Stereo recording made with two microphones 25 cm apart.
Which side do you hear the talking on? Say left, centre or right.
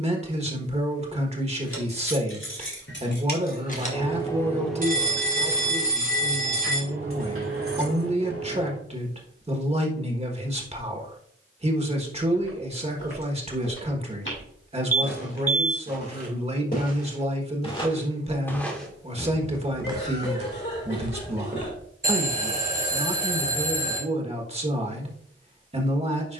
right.